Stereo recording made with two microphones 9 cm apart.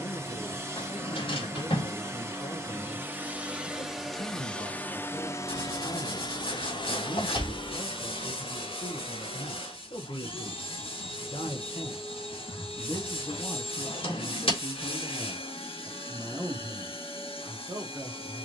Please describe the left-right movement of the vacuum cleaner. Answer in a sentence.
You can hear the vacuum cleaner travel towards the left.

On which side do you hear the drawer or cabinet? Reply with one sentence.
You can hear the drawer or cabinet on the left.